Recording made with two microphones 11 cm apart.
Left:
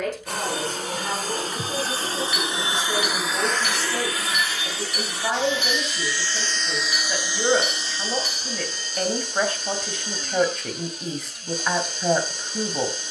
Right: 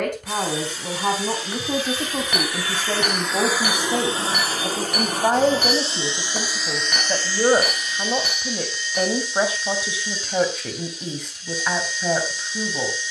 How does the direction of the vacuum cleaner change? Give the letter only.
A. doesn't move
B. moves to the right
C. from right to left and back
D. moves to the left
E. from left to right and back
E.